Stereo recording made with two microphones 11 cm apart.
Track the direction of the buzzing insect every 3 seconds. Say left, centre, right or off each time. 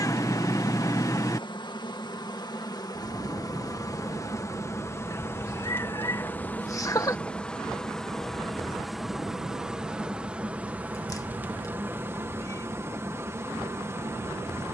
left, left, centre, centre, right.